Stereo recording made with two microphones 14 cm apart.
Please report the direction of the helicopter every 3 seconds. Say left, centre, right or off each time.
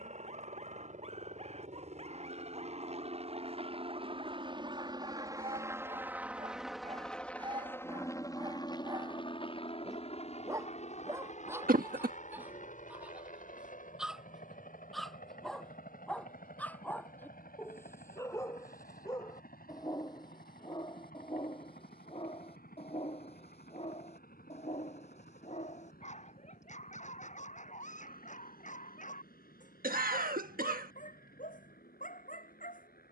right, right, centre, left, left, left, left, left, left, left, left.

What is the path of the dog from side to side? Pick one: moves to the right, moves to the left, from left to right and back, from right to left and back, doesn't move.
moves to the left.